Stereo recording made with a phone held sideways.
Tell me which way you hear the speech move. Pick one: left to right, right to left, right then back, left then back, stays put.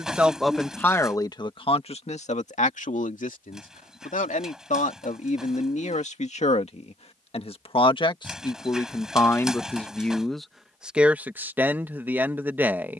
left then back.